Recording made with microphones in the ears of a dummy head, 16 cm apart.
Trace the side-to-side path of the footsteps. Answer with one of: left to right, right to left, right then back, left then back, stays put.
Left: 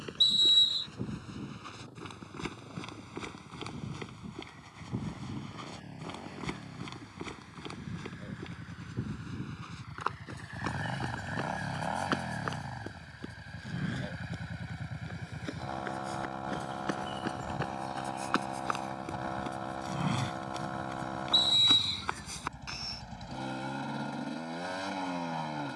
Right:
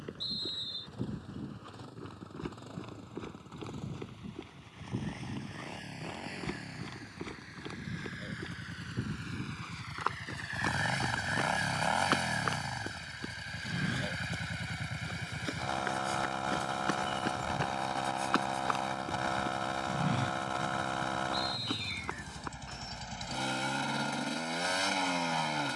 right then back.